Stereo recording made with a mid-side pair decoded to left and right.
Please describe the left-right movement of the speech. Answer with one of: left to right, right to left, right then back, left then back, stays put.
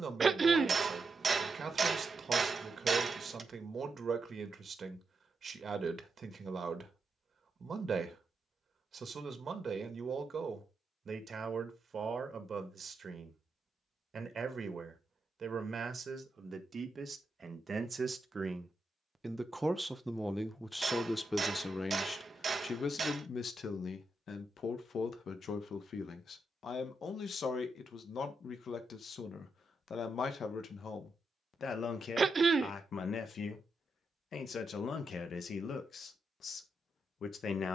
right to left.